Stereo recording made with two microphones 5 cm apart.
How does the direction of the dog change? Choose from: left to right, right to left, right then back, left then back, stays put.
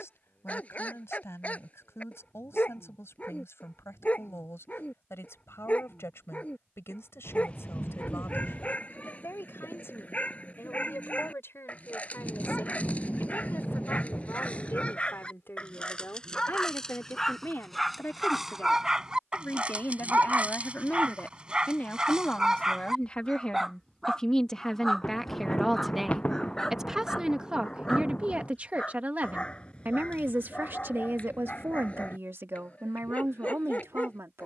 right then back.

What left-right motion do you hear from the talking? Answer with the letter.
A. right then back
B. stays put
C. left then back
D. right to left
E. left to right
E.